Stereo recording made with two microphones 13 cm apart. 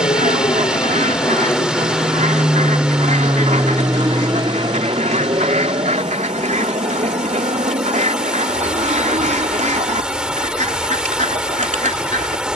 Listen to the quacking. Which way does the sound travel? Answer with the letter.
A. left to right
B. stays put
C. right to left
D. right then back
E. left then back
B.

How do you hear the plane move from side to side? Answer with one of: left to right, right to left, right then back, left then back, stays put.
left to right.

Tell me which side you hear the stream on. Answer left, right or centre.
centre.